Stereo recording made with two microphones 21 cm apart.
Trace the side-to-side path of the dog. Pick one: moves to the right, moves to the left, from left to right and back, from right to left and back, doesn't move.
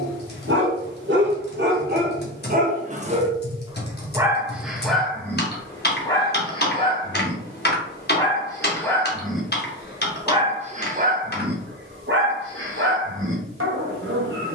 from right to left and back.